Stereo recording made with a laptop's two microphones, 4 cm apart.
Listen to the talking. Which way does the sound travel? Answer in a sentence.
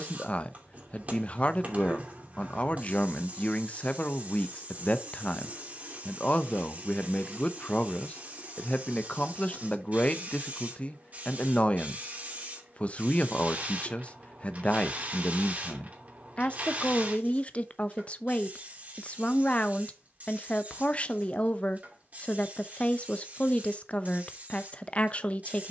You can hear the talking stay put.